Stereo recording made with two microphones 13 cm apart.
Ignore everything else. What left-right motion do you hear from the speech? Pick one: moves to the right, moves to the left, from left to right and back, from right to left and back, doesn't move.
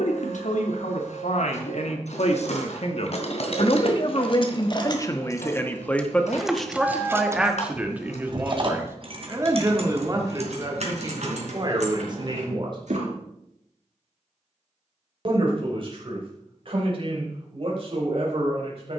moves to the right.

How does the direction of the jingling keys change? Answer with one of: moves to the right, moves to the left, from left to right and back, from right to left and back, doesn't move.
moves to the right.